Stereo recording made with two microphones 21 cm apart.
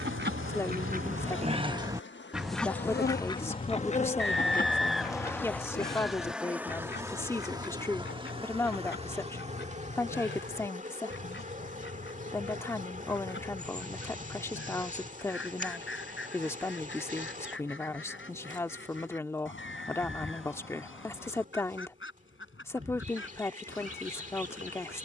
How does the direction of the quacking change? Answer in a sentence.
In this clip you hear the quacking go from the right side to the left.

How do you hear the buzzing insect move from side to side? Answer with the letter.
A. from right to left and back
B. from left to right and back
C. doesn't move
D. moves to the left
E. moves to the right
E.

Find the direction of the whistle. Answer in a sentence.
You can hear the whistle in the centre.